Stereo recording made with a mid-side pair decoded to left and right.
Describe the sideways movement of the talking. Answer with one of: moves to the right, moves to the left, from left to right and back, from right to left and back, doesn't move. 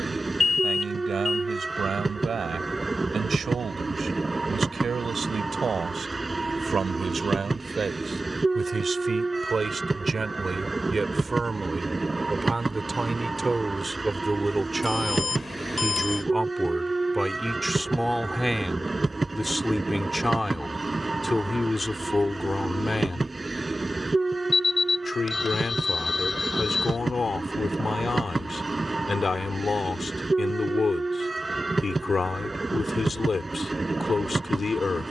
moves to the left.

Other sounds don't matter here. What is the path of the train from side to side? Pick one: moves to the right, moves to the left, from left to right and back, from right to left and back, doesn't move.
doesn't move.